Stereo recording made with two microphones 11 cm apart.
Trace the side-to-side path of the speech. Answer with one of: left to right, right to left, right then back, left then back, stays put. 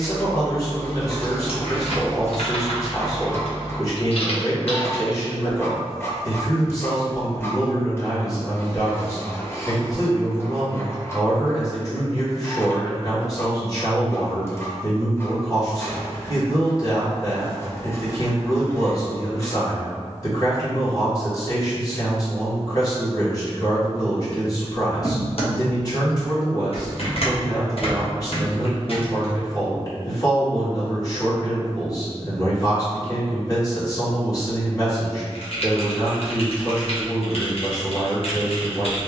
stays put.